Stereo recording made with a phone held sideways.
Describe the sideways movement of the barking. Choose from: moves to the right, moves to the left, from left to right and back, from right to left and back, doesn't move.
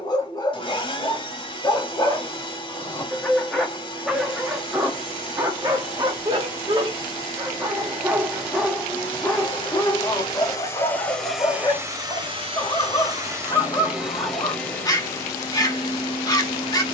from left to right and back.